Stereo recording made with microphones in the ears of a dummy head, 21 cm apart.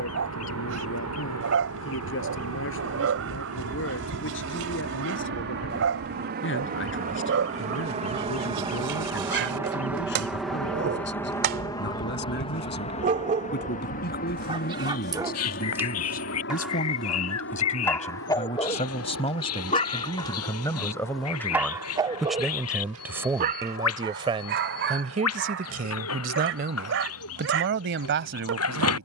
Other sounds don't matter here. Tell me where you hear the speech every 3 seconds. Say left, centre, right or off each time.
left, left, left, left, left, left, left, centre, right, right.